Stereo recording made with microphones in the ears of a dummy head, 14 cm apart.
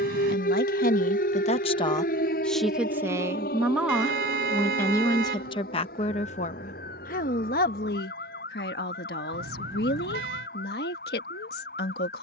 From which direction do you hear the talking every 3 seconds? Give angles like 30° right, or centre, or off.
40° left, 10° left, 60° left, 70° left.